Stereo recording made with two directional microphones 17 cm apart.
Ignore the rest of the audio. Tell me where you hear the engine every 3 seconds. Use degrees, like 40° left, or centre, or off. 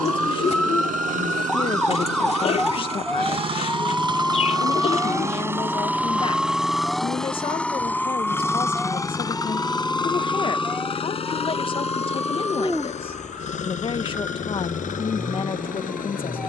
50° right, 20° right, 10° left, 30° left, 40° left, 50° left.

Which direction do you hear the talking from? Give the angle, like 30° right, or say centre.
30° left.